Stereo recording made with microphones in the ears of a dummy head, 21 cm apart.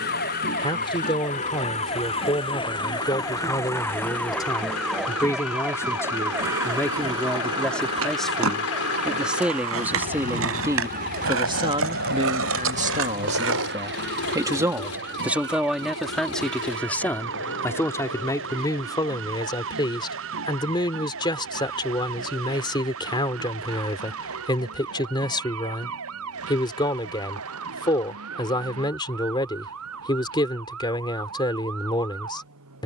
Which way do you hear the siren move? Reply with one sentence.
In this clip you hear the siren travel towards the right.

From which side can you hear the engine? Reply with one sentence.
You can hear the engine on the left.